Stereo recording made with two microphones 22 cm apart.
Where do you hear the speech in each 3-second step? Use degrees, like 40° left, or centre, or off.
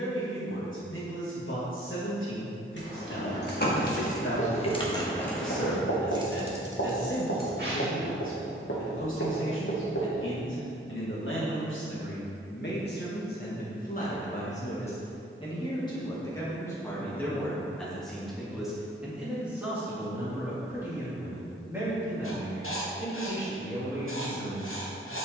70° left, 70° left, 70° left, 70° left, 40° left, 10° left, 10° right, 10° right, 10° right.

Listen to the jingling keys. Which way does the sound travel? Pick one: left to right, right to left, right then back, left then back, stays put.
left to right.